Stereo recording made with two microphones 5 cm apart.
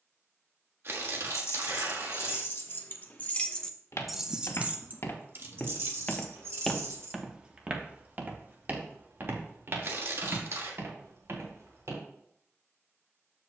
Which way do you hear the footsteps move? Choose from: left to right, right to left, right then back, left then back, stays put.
left to right.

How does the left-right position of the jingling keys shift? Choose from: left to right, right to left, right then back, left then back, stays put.
left to right.